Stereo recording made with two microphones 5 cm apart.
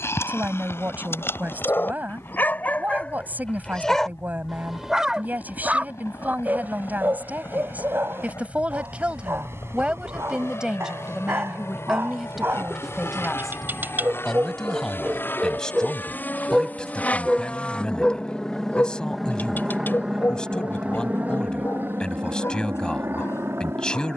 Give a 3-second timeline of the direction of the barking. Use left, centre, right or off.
left, centre, right, right, right, centre, left, left.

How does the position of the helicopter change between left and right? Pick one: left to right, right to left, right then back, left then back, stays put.
left to right.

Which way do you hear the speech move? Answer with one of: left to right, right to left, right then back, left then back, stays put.
right to left.